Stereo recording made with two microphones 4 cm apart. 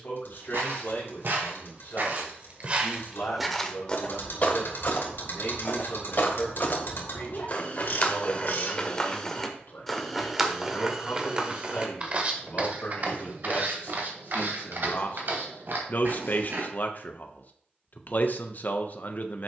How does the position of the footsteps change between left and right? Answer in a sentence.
In this clip you hear the footsteps go left and come back.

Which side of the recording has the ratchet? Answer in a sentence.
You can hear the ratchet on the left.